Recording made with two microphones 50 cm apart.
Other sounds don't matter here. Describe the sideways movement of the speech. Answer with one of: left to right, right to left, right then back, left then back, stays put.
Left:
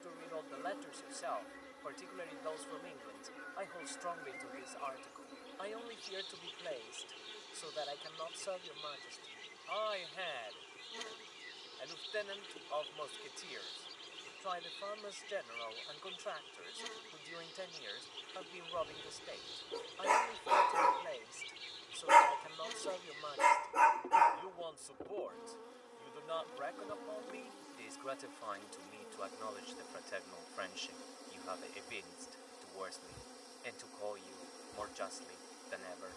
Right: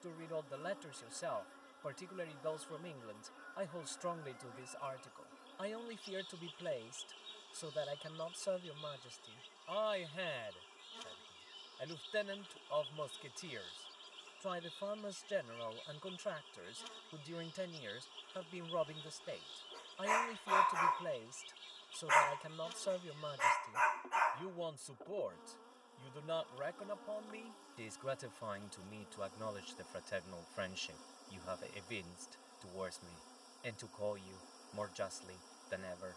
stays put.